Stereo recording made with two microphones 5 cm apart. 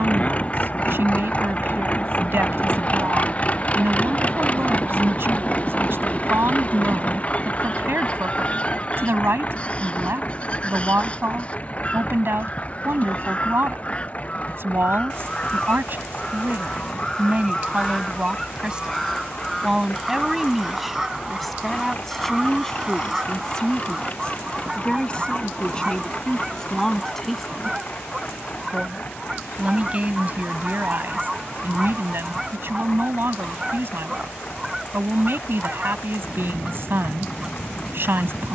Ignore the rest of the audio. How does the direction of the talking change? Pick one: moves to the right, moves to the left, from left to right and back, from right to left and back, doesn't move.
from right to left and back.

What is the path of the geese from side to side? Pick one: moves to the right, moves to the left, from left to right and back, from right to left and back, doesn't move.
moves to the right.